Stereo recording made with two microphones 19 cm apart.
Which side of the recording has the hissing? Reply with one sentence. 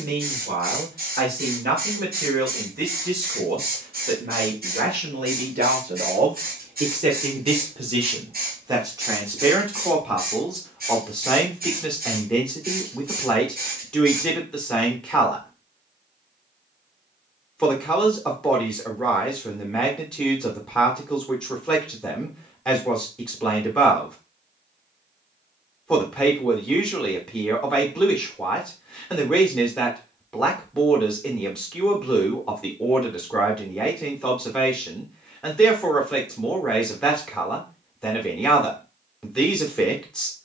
In this clip you hear the hissing on the right.